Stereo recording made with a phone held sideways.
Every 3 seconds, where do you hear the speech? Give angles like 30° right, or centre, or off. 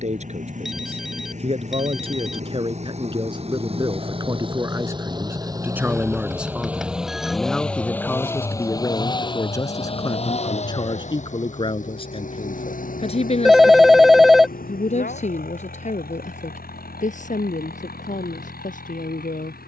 40° right, 20° right, centre, 30° left, 40° left, 50° left, 60° left.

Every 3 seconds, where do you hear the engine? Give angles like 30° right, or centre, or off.
50° right, 30° right, centre, 40° left, 70° left, 80° left, 80° left.